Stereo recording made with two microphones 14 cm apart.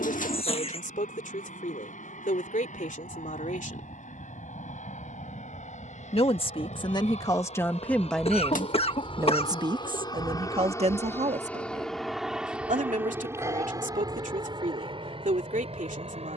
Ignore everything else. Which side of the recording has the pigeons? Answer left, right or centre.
left.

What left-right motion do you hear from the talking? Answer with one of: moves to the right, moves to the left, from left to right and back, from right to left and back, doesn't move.
moves to the right.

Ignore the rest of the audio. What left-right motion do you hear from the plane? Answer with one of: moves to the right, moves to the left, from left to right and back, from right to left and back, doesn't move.
moves to the right.